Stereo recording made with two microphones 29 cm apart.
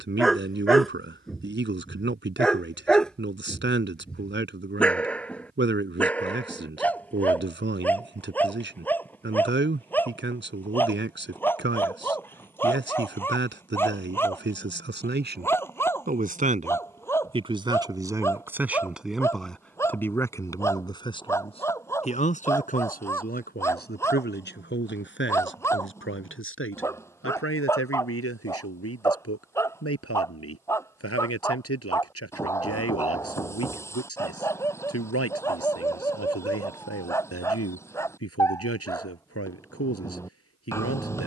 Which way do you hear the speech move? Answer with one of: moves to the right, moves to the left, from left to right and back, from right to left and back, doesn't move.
moves to the left.